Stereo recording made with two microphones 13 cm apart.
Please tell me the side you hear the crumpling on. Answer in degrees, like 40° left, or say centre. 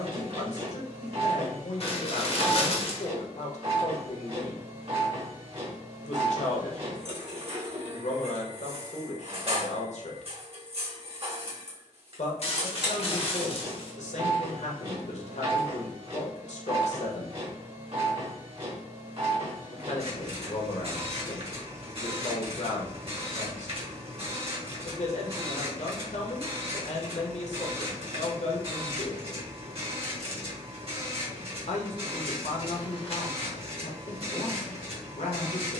50° left.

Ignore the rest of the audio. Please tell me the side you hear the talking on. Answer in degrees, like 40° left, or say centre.
60° left.